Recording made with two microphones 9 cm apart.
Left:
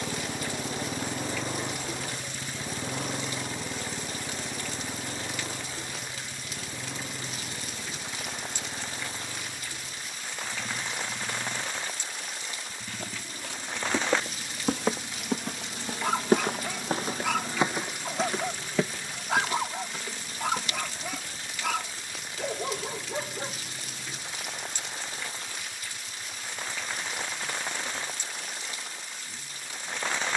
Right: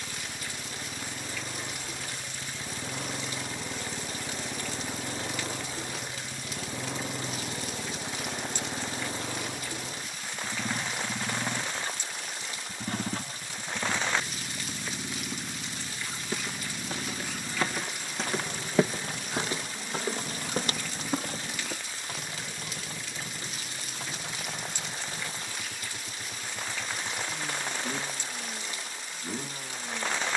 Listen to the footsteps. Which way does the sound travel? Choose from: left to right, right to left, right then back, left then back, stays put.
left to right.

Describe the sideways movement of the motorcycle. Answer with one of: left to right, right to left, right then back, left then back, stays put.
left to right.